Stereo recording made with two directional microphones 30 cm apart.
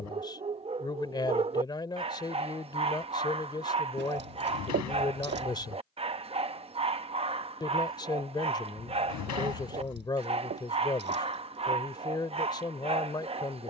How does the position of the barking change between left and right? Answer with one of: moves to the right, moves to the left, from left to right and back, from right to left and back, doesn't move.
doesn't move.